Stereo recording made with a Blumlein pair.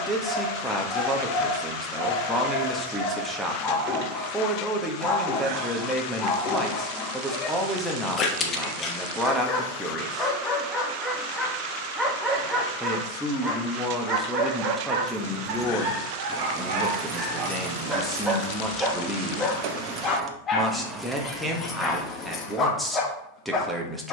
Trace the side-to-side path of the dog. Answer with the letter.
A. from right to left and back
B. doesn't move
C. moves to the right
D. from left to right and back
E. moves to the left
D.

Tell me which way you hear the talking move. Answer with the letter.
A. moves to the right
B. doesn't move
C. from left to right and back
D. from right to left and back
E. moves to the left
B.